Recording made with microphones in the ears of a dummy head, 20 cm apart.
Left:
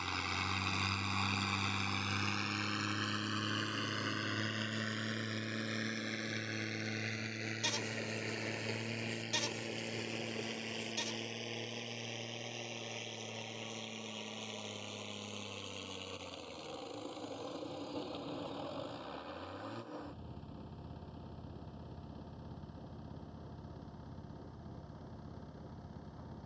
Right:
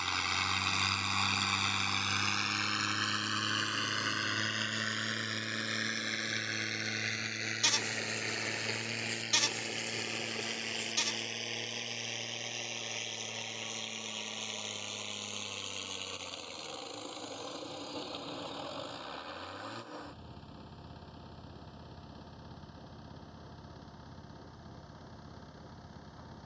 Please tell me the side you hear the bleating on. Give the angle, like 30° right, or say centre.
50° right.